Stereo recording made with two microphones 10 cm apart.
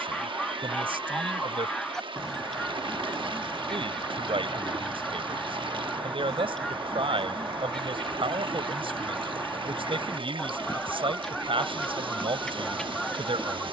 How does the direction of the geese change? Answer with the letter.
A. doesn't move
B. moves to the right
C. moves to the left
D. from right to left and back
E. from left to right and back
A.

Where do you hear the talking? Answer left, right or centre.
right.